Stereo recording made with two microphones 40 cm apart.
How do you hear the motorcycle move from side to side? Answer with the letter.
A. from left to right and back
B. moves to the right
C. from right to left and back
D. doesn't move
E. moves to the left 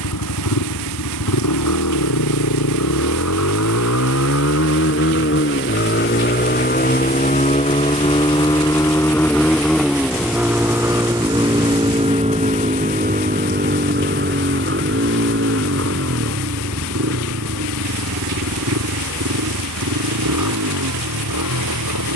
B.